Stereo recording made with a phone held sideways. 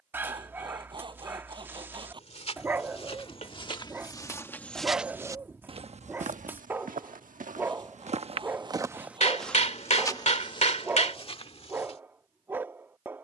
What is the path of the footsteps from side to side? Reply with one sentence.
In this clip you hear the footsteps move from left to right and back again.